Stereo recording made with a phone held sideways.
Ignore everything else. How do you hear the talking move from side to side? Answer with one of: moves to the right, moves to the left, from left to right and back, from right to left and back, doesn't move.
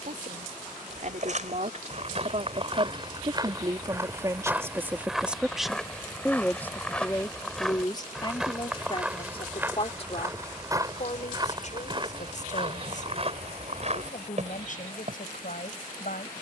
moves to the left.